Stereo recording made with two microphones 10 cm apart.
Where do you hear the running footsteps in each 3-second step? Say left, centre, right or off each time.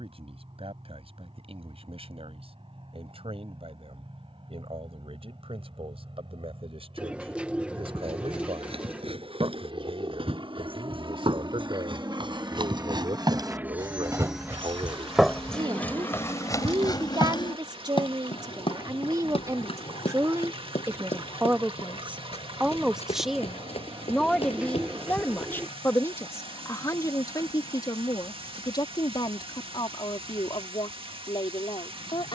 off, off, right, right, right, left, left, left, left, off, off.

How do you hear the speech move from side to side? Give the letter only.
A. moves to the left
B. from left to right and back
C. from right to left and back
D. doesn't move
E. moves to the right
A.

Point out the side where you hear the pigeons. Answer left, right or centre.
centre.